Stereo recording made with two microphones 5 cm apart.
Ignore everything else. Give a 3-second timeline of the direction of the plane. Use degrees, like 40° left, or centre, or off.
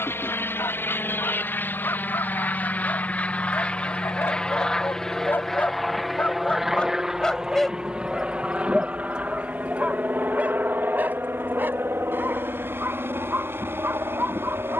40° left, 20° left, 10° right, 30° right, 50° right.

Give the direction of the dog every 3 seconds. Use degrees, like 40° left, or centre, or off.
60° left, 50° left, 10° left, 30° right, 50° right.